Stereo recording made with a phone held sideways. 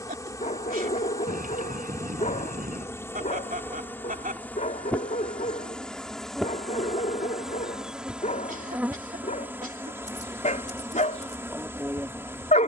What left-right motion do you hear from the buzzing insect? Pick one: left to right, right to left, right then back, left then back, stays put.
left to right.